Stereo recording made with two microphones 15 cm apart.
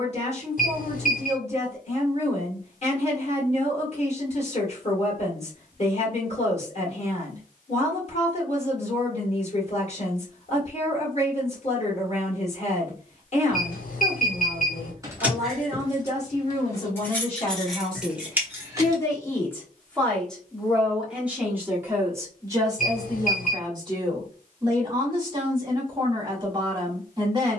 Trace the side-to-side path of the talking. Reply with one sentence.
In this clip you hear the talking go from the left side to the right.